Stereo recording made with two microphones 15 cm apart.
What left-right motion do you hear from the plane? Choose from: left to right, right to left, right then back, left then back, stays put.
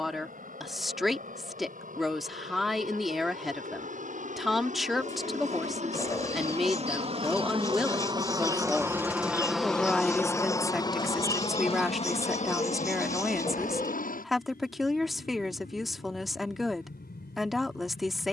right to left.